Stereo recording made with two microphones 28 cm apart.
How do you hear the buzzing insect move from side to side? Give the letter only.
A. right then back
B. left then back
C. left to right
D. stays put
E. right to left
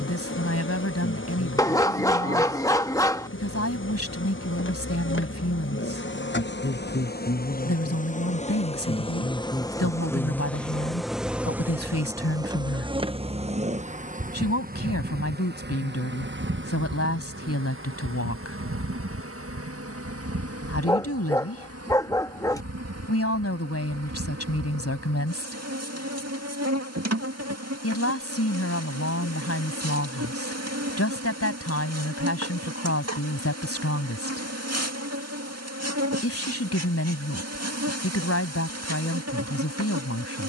C.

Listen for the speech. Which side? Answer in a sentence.
In this clip you hear the speech on the left.